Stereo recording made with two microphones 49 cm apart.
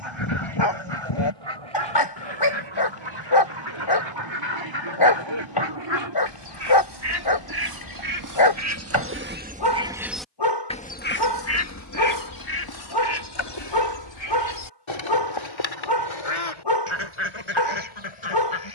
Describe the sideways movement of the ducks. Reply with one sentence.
In this clip you hear the ducks move to the left.